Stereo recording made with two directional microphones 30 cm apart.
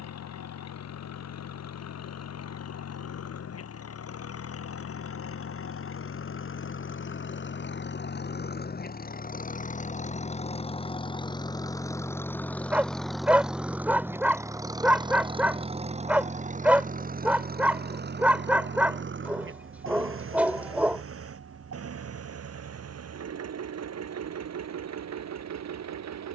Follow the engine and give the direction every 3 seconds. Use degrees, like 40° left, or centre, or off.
60° left, 50° left, 40° left, 20° left, centre, 20° right, 40° right, 50° right, 60° right.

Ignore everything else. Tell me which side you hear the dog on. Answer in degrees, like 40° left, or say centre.
centre.